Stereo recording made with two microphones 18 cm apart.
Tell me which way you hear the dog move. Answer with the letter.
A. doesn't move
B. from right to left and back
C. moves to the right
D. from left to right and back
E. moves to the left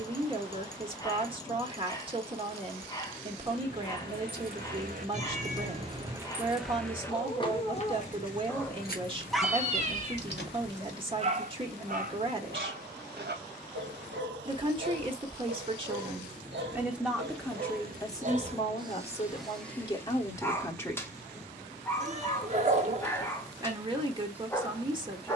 D.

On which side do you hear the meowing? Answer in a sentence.
You can hear the meowing on the right.